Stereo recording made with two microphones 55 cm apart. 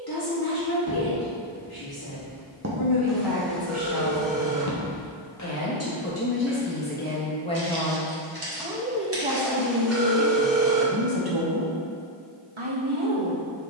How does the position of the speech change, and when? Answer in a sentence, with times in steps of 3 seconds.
In this clip you hear the speech on the left from 0 s, in the centre from 6 s and on the right from 9 s.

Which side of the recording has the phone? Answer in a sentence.
In this clip you hear the phone in the centre.